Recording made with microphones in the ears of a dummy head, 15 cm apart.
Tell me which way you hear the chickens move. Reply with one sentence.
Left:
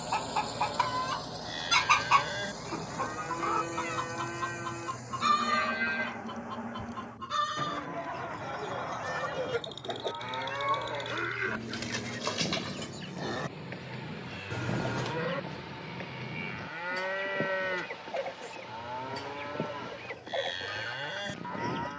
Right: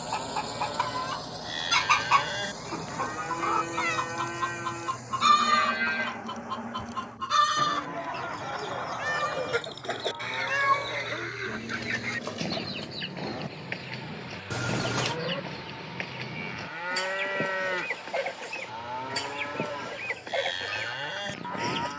You can hear the chickens travel towards the right.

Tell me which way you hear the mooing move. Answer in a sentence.
You can hear the mooing go left and come back.